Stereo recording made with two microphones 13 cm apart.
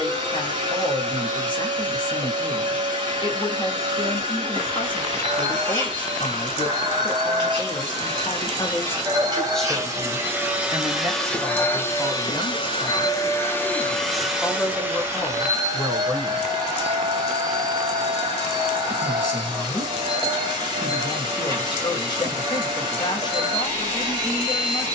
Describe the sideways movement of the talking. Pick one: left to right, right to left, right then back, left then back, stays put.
right then back.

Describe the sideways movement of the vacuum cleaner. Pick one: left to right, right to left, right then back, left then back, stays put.
left then back.